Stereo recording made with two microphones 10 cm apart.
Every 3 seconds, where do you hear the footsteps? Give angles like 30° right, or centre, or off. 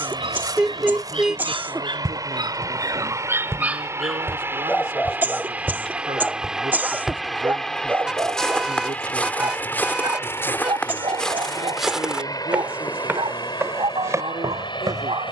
40° right, 20° right, centre, 10° left, 20° right.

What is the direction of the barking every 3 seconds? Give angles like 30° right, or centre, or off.
60° right, centre, 20° right, 50° right, 60° right.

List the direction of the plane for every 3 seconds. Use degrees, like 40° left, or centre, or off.
40° right, 20° right, centre, 30° left, 40° left.